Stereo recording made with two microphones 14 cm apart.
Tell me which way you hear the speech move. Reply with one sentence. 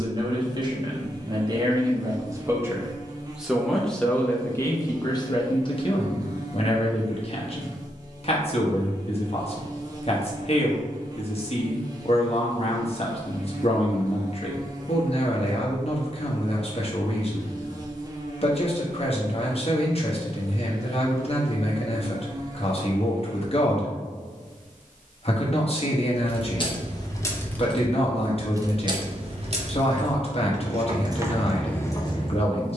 In this clip you hear the speech move to the left.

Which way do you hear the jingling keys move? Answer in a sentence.
You can hear the jingling keys move from left to right and back again.